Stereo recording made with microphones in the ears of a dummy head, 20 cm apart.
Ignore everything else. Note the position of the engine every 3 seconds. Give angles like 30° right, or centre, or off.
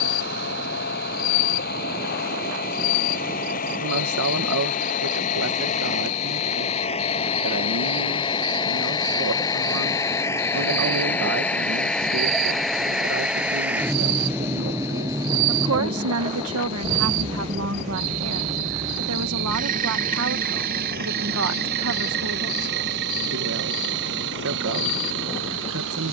40° left, 40° left, 30° left, 10° left, 10° right, 20° right, 40° right, 50° right, 60° right.